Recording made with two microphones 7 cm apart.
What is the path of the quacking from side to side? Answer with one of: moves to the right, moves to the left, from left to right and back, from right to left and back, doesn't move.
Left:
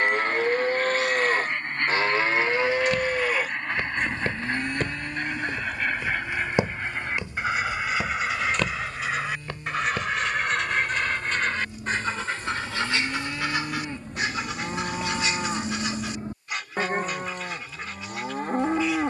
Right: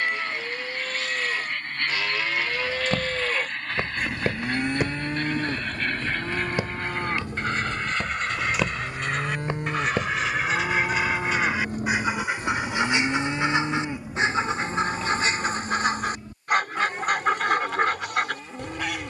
moves to the right.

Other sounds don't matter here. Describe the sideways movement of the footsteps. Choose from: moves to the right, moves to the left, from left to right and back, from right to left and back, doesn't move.
from right to left and back.